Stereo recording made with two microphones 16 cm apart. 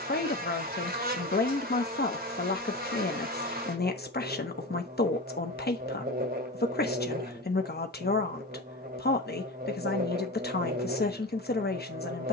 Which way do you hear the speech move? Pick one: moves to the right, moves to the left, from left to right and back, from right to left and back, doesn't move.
doesn't move.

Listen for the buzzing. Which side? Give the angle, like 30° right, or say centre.
60° right.